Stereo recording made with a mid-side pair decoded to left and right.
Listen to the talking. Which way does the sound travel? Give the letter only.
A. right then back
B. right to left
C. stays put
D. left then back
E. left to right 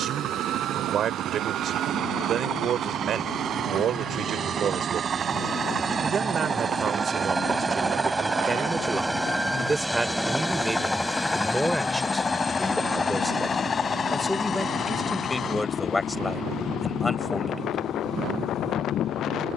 B.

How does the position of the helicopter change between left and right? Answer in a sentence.
In this clip you hear the helicopter move to the left.